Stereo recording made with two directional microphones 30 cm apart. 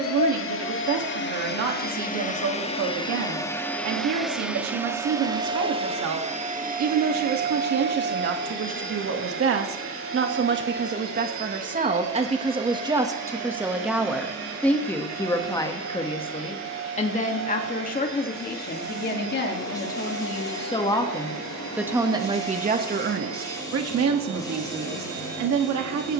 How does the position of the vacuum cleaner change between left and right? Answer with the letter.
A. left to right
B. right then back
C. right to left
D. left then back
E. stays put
A.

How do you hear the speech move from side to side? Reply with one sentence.
You can hear the speech go left and come back.